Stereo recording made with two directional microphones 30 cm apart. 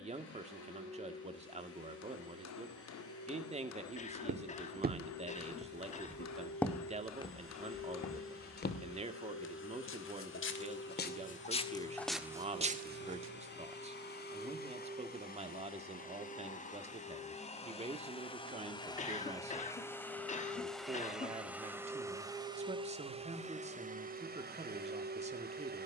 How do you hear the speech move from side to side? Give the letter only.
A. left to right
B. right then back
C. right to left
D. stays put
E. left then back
D.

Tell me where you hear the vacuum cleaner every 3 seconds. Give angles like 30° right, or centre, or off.
50° left, 50° left, 50° left, 40° left, 40° left, 30° left, 10° left, 10° right, 30° right.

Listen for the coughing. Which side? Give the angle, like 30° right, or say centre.
20° left.